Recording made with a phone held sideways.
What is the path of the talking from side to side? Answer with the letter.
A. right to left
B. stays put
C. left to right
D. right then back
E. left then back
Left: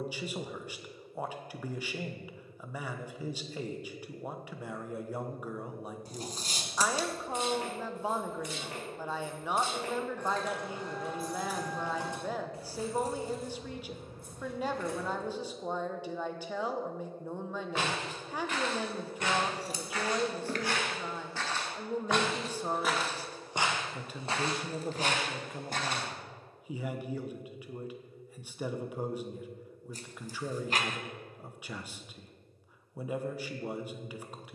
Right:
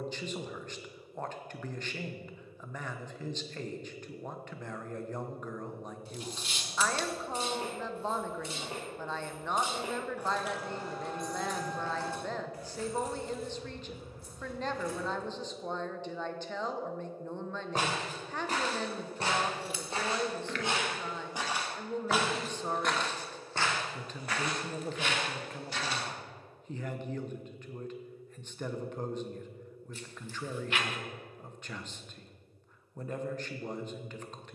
B.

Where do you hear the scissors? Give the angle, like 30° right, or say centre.
40° left.